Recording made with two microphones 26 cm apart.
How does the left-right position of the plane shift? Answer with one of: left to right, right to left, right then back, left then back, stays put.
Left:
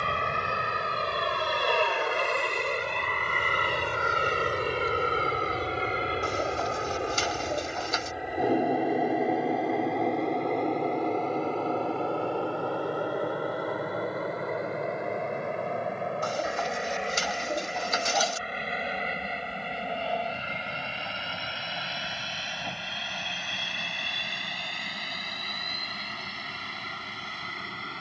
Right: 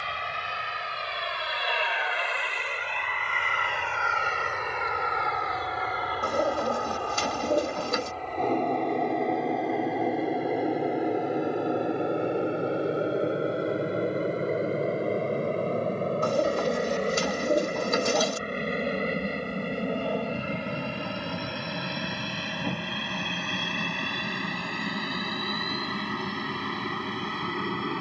left to right.